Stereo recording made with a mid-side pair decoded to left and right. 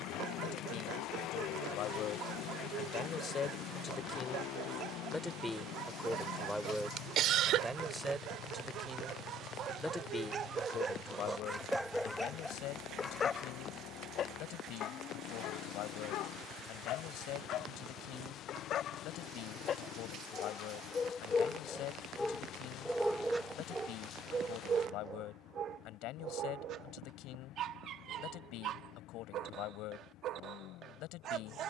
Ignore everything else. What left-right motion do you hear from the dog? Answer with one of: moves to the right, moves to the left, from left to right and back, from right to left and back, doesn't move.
from right to left and back.